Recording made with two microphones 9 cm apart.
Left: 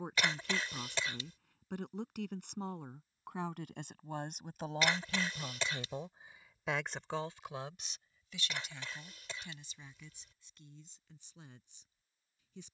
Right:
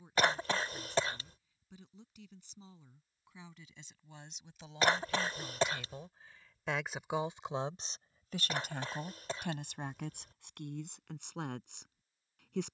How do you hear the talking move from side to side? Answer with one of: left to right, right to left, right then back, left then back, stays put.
left to right.